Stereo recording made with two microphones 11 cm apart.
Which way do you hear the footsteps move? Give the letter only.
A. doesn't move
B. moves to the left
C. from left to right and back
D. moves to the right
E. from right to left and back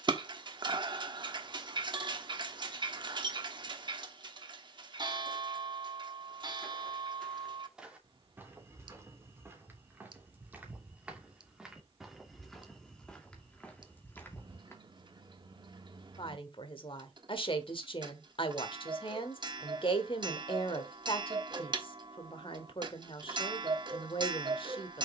C.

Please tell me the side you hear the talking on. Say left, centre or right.
left.